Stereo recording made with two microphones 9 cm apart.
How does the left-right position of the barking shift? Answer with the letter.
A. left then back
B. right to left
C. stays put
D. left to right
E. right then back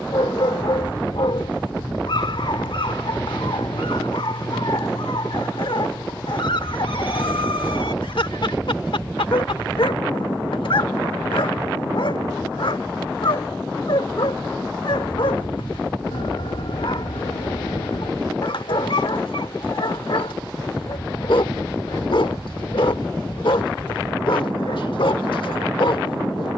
C.